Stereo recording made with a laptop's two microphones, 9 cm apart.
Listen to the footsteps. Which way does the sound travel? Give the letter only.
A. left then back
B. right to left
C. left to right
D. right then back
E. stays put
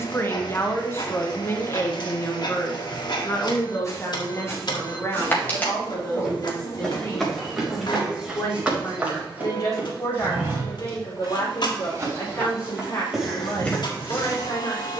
D.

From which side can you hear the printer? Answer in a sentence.
In this clip you hear the printer on the left.